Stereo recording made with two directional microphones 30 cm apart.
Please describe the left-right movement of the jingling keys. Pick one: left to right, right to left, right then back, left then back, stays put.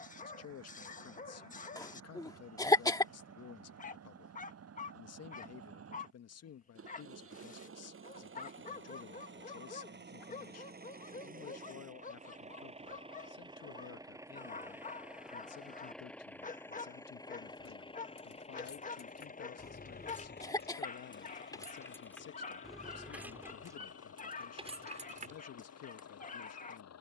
left to right.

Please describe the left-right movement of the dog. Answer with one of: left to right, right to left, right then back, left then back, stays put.
stays put.